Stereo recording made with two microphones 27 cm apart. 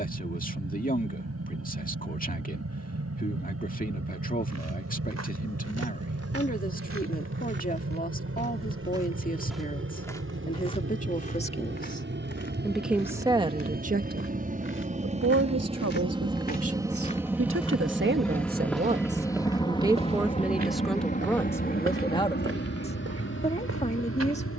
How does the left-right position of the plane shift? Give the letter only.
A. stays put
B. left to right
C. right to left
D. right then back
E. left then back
C.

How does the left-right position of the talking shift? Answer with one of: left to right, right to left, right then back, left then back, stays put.
right then back.